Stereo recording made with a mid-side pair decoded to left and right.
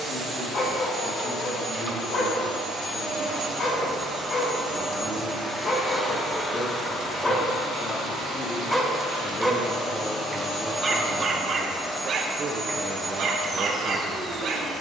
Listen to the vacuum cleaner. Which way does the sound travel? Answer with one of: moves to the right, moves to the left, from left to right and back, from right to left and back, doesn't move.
from right to left and back.